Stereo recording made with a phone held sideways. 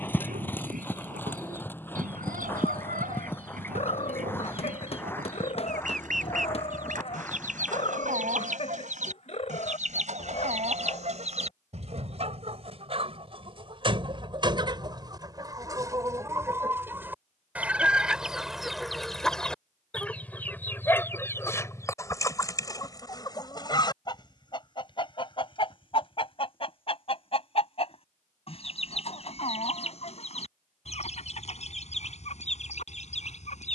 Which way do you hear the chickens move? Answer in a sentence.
You can hear the chickens go from the right side to the left.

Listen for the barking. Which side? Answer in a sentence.
You can hear the barking on the left.